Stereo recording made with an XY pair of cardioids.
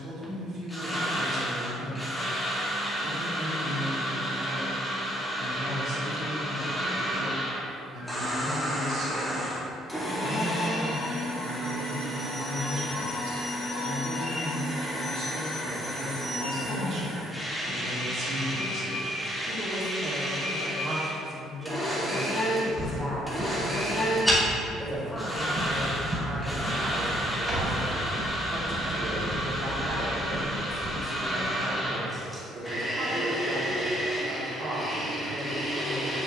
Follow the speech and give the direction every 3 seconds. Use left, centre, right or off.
right, right, right, right, right, right, right, centre, centre, right, right, right.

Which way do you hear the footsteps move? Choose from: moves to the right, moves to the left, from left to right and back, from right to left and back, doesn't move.
from left to right and back.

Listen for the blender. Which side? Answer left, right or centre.
centre.